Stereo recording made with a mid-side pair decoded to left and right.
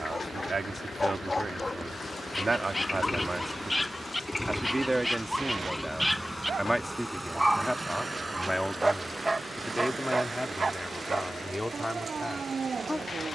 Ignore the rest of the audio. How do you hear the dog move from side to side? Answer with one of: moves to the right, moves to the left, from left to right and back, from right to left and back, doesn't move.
moves to the right.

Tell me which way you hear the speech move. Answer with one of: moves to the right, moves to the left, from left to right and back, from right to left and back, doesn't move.
moves to the left.